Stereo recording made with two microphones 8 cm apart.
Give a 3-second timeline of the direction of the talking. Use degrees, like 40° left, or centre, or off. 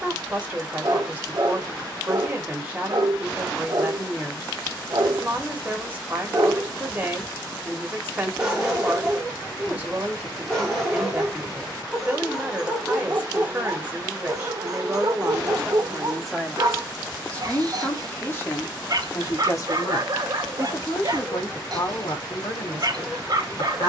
20° right, 20° right, 20° right, 20° right, 20° right, centre, 40° left, 60° left.